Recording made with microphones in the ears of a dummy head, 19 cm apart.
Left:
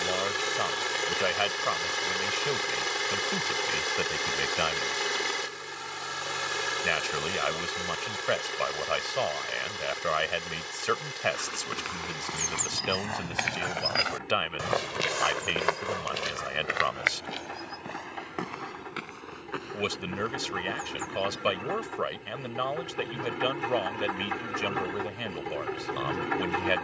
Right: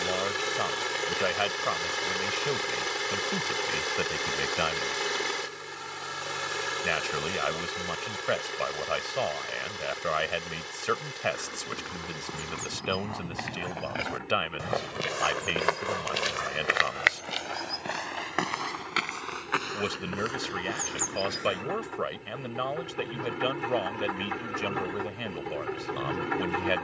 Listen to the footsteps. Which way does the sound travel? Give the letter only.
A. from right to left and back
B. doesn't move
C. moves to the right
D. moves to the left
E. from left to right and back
C.